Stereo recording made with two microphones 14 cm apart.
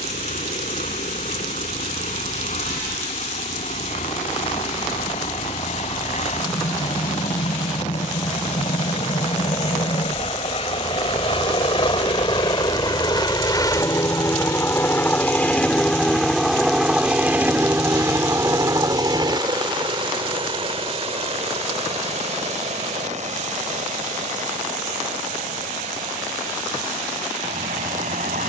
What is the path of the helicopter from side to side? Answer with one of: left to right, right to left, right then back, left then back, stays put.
left to right.